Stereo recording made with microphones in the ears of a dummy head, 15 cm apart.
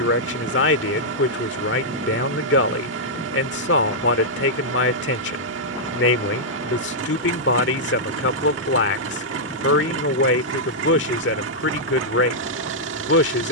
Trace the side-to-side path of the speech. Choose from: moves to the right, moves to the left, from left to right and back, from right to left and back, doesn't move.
doesn't move.